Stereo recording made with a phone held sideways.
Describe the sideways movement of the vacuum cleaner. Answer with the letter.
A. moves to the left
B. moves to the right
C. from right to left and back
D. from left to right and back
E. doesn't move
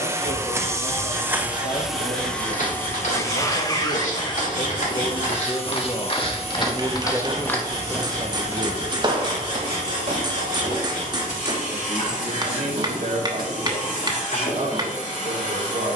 A.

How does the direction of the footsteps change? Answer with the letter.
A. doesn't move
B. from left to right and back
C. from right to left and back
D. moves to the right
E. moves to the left
D.